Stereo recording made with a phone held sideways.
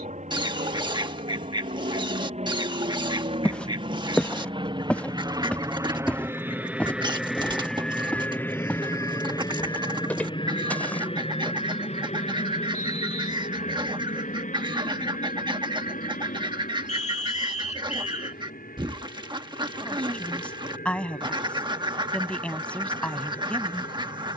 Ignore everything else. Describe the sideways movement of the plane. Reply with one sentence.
You can hear the plane travel towards the left.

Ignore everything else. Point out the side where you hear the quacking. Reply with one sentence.
You can hear the quacking on the right.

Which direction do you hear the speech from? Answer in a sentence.
In this clip you hear the speech in the centre.